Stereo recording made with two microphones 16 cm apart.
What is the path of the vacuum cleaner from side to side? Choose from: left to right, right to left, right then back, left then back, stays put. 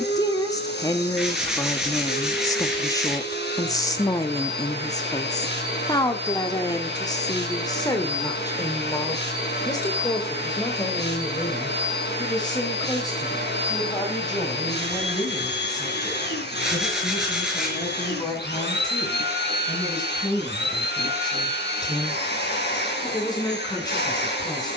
stays put.